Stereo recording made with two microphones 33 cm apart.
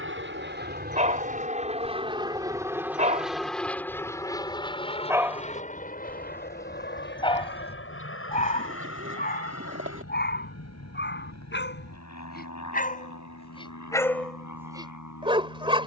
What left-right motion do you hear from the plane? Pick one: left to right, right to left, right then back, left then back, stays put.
right to left.